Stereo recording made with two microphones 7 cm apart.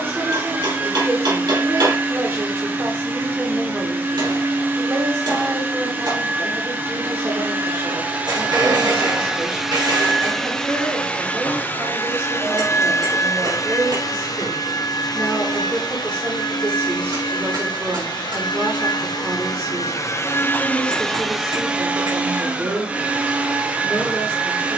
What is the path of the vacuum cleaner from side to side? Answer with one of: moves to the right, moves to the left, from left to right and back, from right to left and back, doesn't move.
from right to left and back.